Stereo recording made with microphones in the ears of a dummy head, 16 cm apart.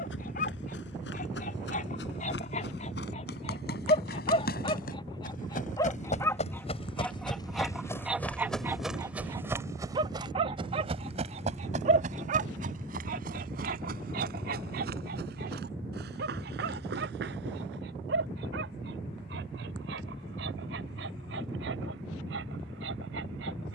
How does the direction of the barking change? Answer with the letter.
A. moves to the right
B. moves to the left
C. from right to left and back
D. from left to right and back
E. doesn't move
A.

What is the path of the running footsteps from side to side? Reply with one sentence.
In this clip you hear the running footsteps go from the left side to the right.